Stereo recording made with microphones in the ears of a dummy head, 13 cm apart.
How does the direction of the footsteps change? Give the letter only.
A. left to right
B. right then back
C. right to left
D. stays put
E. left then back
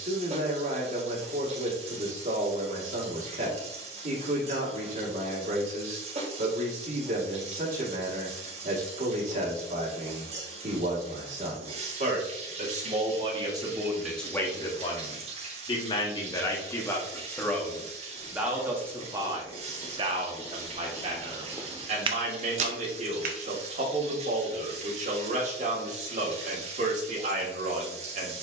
A.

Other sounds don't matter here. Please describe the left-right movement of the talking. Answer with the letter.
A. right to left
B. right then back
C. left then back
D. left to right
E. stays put
C.